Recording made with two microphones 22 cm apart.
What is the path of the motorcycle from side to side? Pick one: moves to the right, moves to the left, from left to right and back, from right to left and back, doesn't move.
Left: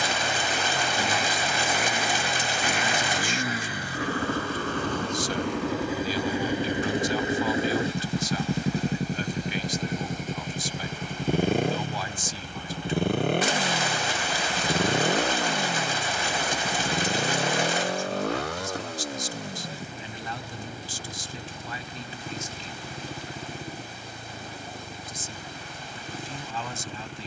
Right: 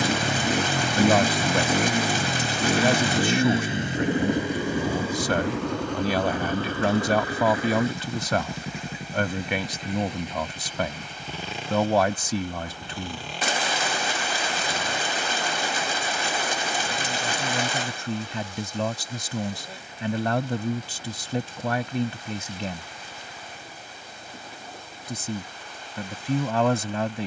moves to the left.